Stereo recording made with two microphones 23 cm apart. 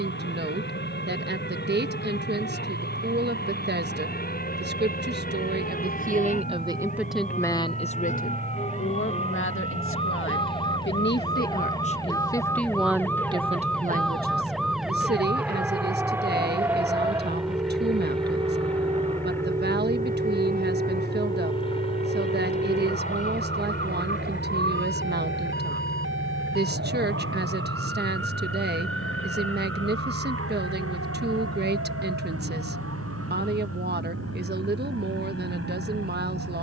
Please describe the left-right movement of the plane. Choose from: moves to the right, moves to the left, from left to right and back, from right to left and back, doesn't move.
moves to the left.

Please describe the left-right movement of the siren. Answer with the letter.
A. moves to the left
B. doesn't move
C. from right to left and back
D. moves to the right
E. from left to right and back
D.